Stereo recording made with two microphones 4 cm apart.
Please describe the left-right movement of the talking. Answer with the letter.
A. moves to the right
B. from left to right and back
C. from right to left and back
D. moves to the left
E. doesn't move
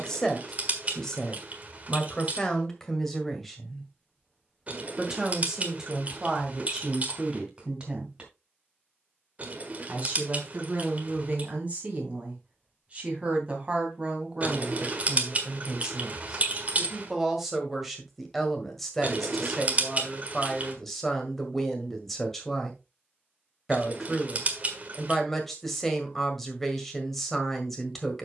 B.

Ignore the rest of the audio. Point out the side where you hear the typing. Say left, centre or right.
right.